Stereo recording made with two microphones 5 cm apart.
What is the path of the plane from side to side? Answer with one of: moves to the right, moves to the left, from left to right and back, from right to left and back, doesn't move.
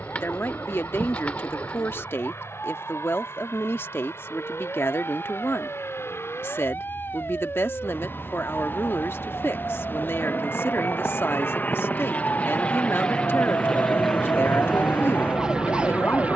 moves to the right.